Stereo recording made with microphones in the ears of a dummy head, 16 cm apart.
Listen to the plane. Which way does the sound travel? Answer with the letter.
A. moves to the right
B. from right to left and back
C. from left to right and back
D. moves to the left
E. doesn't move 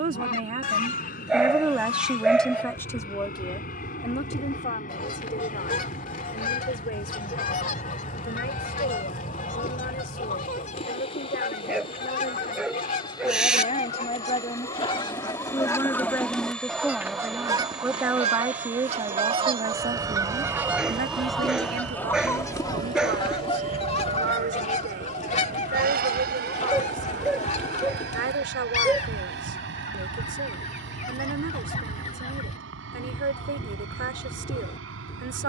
A.